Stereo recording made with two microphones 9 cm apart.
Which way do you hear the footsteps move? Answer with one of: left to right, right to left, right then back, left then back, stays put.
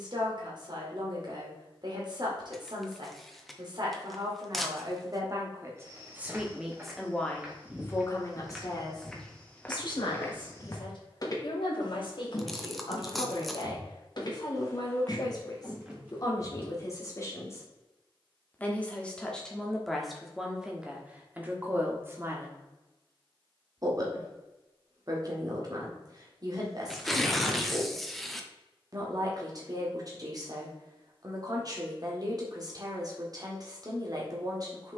left then back.